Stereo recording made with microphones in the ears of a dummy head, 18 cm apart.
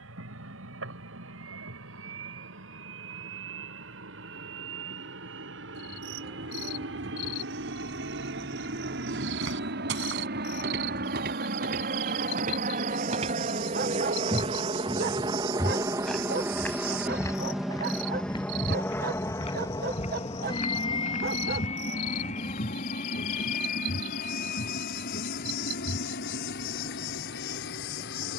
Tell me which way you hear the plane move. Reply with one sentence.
In this clip you hear the plane move from right to left.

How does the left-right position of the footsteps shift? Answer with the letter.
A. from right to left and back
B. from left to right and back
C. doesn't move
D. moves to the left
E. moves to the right
D.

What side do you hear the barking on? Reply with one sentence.
You can hear the barking on the right.